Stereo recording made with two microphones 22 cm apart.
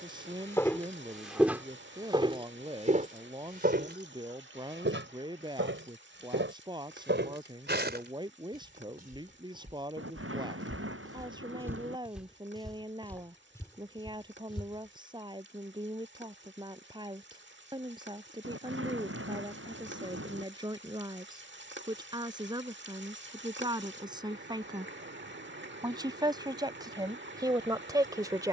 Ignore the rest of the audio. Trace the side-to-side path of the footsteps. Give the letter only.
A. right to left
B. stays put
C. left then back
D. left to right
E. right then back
E.